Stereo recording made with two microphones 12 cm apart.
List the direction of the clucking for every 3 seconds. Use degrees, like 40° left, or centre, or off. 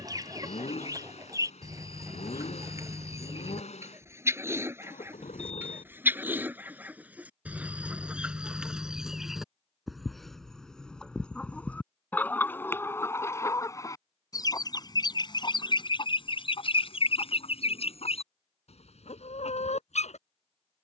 30° right, 20° right, 10° right, centre, 20° left, 50° left, 70° left.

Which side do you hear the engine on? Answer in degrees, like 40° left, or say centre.
70° left.